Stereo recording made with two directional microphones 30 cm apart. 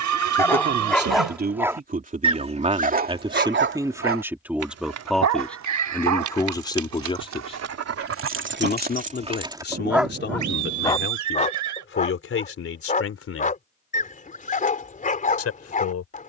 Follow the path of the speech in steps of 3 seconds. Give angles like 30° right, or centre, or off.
30° right, 10° right, 20° left, 40° left, 40° left, 50° left.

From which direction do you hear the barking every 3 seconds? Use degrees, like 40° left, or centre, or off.
centre, 50° right, 50° right, centre, 30° left, 30° left.